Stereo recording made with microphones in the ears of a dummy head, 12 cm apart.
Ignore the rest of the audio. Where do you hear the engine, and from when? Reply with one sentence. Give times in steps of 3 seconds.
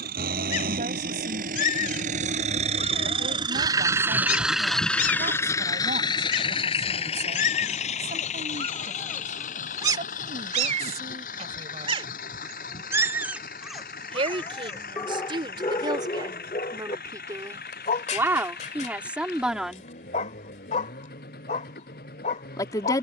You can hear the engine on the right from 0 s, in the centre from 3 s and on the left from 6 s.